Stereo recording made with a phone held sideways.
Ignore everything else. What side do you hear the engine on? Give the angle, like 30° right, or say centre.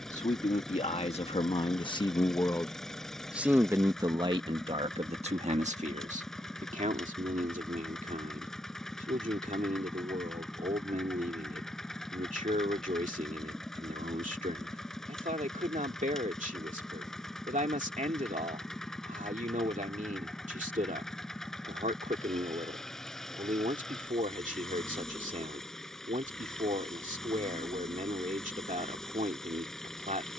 centre.